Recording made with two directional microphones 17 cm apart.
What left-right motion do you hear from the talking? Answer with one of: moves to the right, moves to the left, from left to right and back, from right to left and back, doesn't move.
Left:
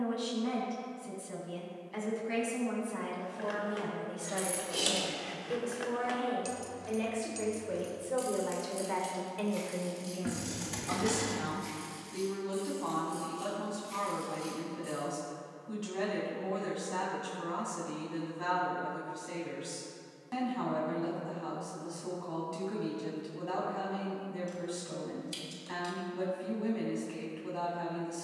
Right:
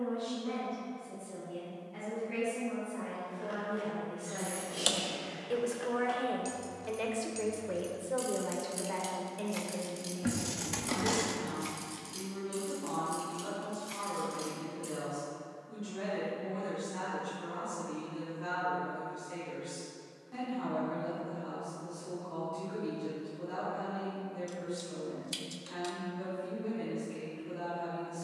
from left to right and back.